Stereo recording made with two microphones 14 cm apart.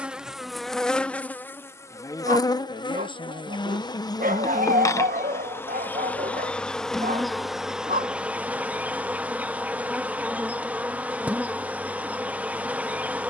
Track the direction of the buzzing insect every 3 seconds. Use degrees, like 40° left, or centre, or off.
10° left, 20° left, centre, 10° right, 10° right.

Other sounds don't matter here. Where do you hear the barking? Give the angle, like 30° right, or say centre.
80° right.